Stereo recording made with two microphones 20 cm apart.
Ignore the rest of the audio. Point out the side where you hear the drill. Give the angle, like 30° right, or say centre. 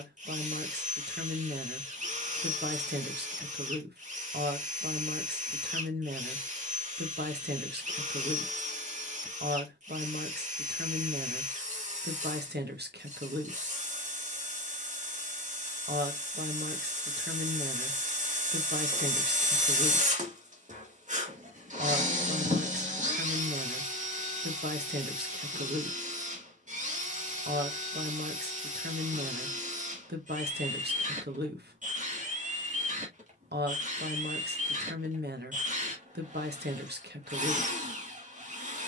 40° right.